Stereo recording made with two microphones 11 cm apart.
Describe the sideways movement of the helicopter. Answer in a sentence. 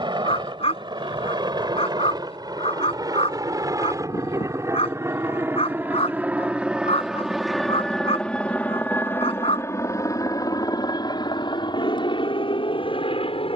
In this clip you hear the helicopter move from right to left.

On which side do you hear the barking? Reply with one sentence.
You can hear the barking on the left.